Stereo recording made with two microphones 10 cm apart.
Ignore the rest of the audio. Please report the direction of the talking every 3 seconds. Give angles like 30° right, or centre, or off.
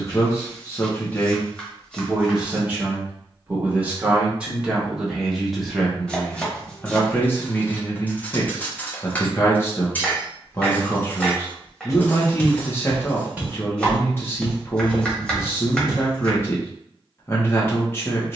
10° left, 10° right, 20° left, 30° left, 30° left, 30° left.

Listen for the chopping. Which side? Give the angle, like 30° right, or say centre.
10° left.